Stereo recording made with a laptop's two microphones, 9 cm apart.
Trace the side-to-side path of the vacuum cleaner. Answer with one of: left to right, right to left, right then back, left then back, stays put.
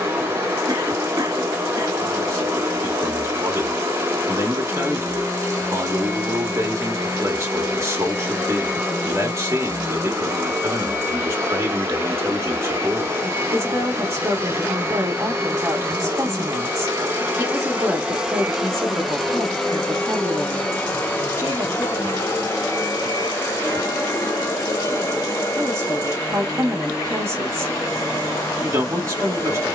right to left.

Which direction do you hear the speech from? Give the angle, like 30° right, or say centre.
30° right.